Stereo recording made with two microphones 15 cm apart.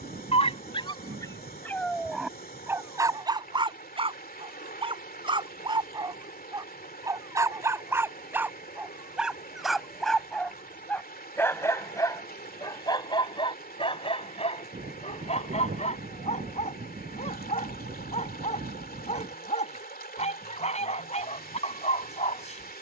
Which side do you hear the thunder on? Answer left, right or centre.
right.